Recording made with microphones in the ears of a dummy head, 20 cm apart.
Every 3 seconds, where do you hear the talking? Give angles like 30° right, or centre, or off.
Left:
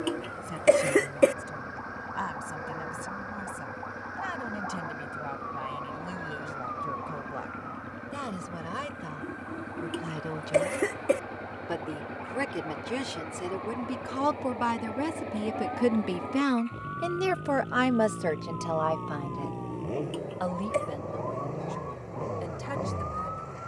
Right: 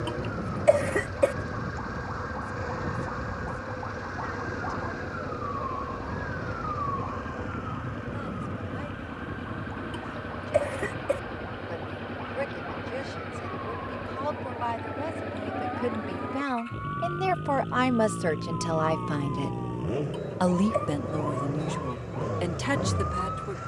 80° left, 70° left, 70° left, 70° left, 60° left, 30° left, 30° right, 70° right.